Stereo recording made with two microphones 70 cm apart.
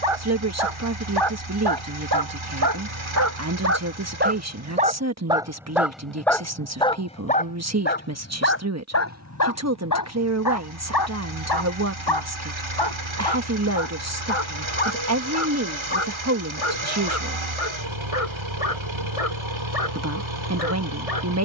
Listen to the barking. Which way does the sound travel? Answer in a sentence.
You can hear the barking move from right to left.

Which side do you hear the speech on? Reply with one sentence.
You can hear the speech on the right.